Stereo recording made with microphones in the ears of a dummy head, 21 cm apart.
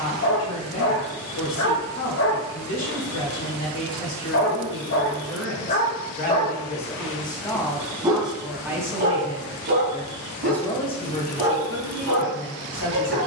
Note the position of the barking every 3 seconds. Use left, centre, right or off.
left, left, centre, right, right.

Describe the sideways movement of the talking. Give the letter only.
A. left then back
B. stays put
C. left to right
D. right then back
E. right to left
D.